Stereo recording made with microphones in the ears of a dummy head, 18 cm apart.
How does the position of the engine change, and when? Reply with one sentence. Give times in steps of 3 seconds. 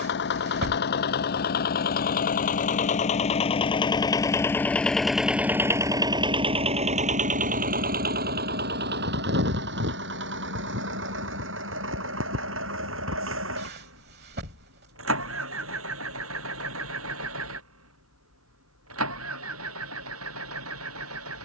In this clip you hear the engine on the left from 0 s, in the centre from 3 s and on the right from 6 s.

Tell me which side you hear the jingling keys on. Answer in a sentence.
You can hear the jingling keys on the right.